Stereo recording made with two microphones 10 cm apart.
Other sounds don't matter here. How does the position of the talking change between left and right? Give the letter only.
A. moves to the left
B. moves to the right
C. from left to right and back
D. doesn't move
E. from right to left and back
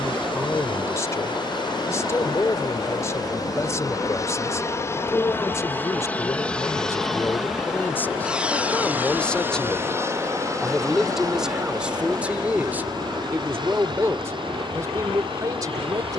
B.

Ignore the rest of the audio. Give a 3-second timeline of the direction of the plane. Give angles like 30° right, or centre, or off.
50° left, 30° left, centre, 30° right, 40° right, 50° right.